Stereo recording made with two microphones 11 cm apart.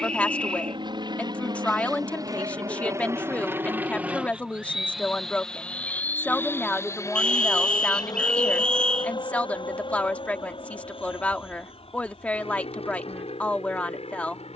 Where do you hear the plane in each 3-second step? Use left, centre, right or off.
right, centre, left, left, left.